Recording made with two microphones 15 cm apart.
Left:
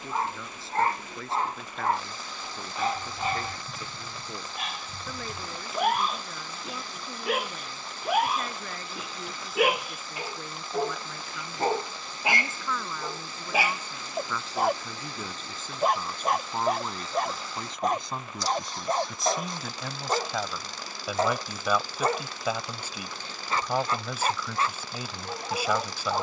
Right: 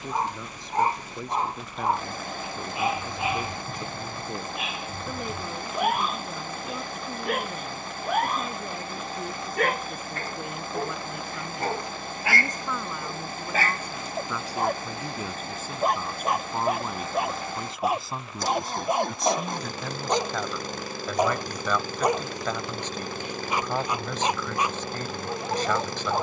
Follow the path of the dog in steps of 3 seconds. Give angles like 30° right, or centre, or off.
10° right, centre, centre, 10° left, 10° left, centre, 10° right, 10° right, 10° right.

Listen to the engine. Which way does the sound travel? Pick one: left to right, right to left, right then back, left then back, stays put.
stays put.